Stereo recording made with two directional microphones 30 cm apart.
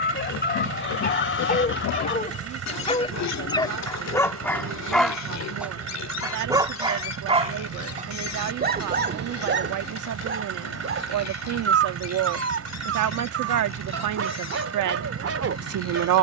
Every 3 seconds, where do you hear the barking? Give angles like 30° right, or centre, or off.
30° left, 10° left, 20° right, 40° right, 50° right, 50° right.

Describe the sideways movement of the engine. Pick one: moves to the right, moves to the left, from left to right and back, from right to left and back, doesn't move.
doesn't move.